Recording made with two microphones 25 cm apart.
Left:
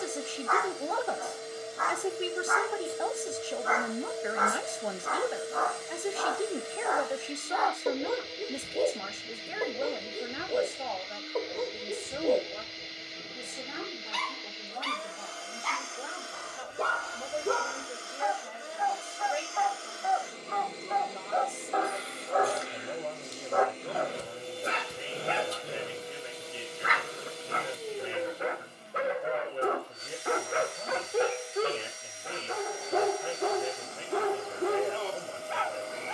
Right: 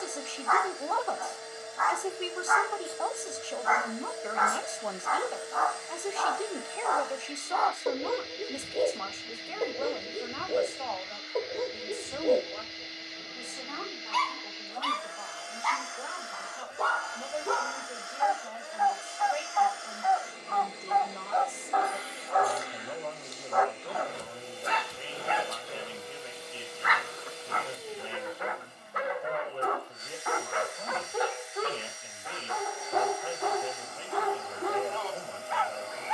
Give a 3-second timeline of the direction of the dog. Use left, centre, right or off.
left, left, centre, centre, centre, left, left, left, left, left, left, left.